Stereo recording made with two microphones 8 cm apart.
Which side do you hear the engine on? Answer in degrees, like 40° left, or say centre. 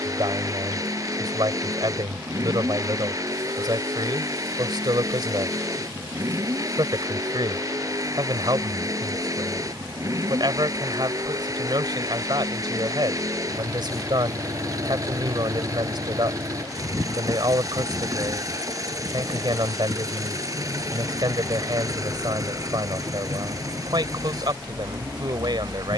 40° right.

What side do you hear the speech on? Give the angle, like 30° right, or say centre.
70° right.